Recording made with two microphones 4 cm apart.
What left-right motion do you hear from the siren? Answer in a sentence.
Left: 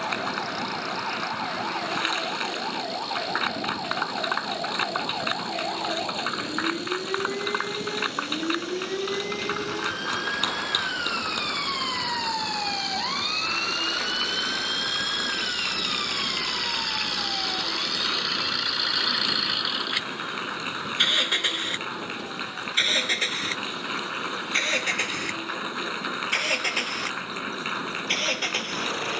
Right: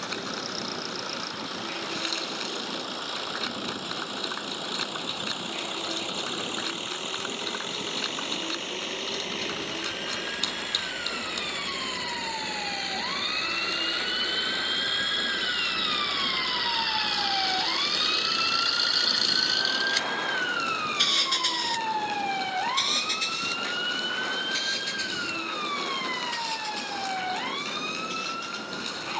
You can hear the siren go from the left side to the right.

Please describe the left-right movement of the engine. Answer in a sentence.
You can hear the engine go from the right side to the left.